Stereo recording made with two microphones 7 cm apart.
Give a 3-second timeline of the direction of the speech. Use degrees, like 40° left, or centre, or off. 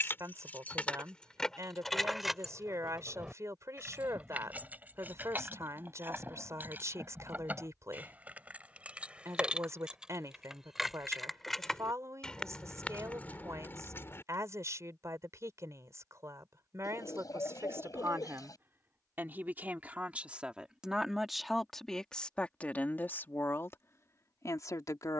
50° right, 50° right, 50° right, 50° right, 50° right, 40° right, 30° right, 20° left, 50° left.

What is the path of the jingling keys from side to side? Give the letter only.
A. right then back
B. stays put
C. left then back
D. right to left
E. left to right
A.